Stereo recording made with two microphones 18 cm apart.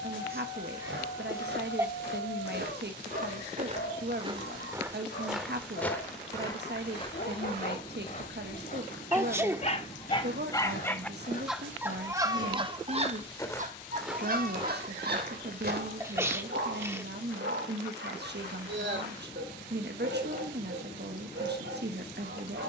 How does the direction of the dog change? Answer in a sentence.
In this clip you hear the dog move to the right.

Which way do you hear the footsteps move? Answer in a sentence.
In this clip you hear the footsteps go left and come back.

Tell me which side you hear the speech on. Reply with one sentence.
In this clip you hear the speech on the right.